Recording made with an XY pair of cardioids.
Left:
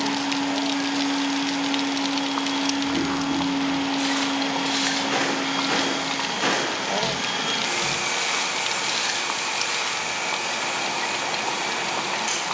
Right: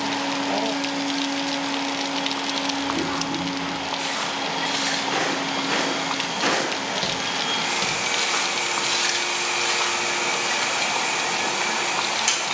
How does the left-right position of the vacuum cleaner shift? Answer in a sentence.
You can hear the vacuum cleaner go from the left side to the right.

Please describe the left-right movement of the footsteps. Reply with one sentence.
In this clip you hear the footsteps move from left to right.